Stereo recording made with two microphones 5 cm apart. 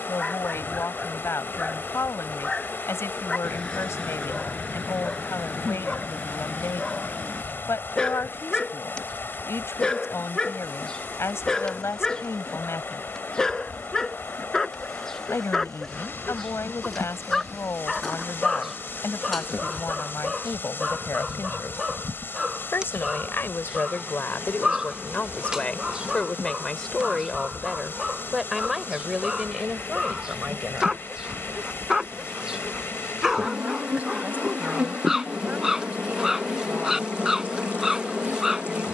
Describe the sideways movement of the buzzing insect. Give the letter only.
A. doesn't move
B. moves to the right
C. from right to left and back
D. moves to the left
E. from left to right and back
B.